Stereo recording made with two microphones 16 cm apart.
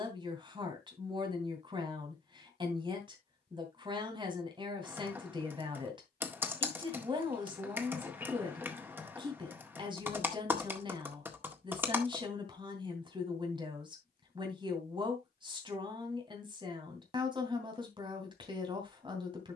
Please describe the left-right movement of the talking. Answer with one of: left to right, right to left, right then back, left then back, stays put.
stays put.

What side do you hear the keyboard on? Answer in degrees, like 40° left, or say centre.
10° right.